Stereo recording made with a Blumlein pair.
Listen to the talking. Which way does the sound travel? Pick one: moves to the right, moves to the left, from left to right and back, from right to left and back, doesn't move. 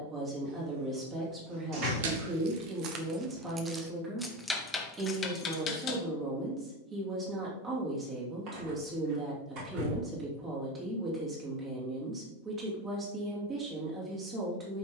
doesn't move.